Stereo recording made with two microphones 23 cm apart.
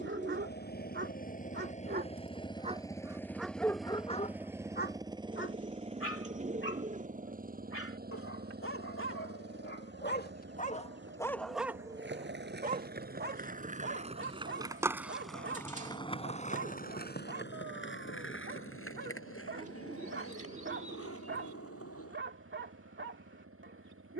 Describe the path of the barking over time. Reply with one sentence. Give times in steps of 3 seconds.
You can hear the barking on the right from 0 s, on the left from 3 s and on the right from 12 s.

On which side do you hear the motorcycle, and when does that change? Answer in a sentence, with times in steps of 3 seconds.
You can hear the motorcycle on the left from 0 s, in the centre from 3 s and on the right from 6 s.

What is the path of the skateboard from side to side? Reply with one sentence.
In this clip you hear the skateboard go from the right side to the left.